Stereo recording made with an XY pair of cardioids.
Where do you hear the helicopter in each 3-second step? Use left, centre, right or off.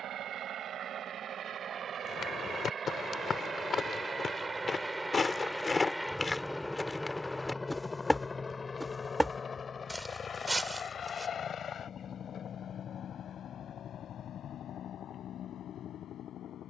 right, right, centre, left, left, left.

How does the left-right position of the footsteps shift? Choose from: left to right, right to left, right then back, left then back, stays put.
left to right.